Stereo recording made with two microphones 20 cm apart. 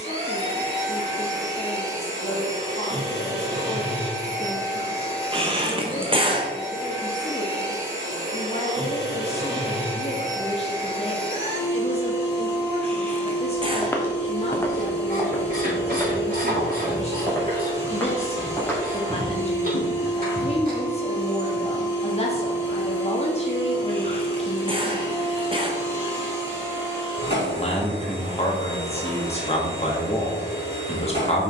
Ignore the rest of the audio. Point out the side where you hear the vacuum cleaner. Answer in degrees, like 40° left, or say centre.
30° left.